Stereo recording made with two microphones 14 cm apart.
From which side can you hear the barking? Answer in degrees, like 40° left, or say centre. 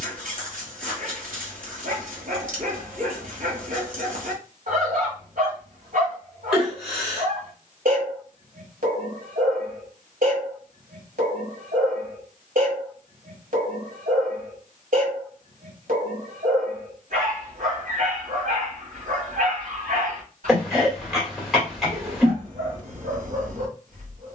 70° right.